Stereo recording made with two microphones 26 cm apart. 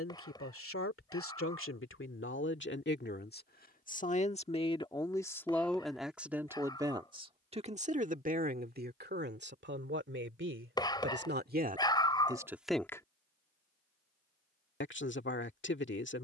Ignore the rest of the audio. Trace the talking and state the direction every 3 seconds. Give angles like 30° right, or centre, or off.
50° left, 20° left, 20° right, 40° right, 10° left, 50° left.